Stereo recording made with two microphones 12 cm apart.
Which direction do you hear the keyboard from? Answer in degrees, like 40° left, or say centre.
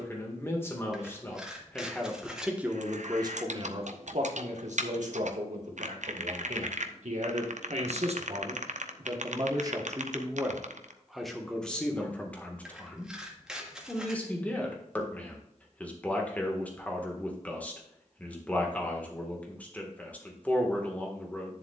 70° right.